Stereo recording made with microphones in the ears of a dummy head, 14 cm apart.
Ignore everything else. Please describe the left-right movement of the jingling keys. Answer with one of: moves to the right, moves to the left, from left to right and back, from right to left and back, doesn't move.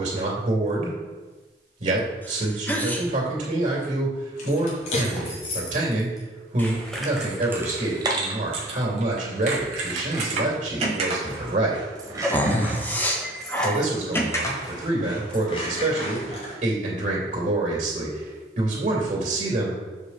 from left to right and back.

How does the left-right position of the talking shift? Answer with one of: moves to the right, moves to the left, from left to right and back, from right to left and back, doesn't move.
doesn't move.